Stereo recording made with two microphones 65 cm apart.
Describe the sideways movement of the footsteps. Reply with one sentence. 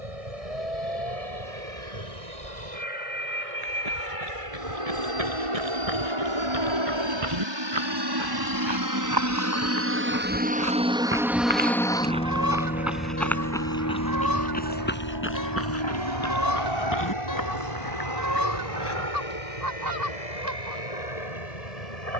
You can hear the footsteps travel towards the left.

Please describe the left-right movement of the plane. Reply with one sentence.
In this clip you hear the plane travel towards the left.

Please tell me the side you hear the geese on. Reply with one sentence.
You can hear the geese on the right.